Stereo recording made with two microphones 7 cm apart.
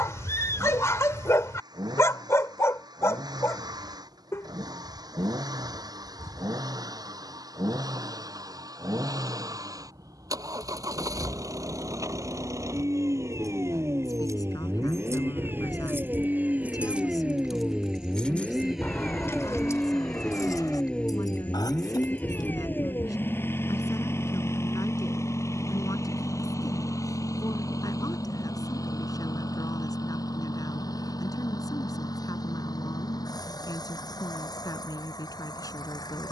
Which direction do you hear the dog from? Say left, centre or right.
left.